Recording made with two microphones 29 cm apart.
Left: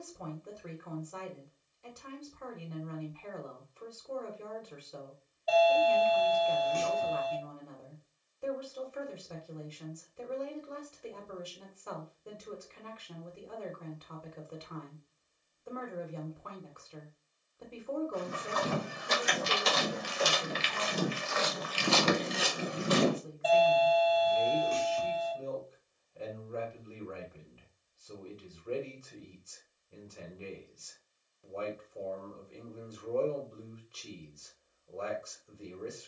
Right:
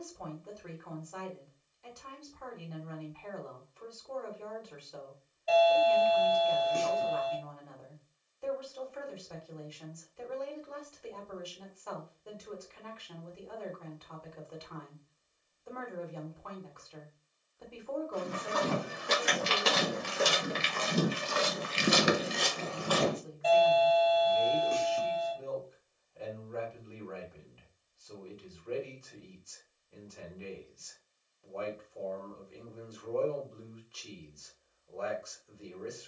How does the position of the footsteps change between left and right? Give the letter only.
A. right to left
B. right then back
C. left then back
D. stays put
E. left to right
A.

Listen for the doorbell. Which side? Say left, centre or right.
right.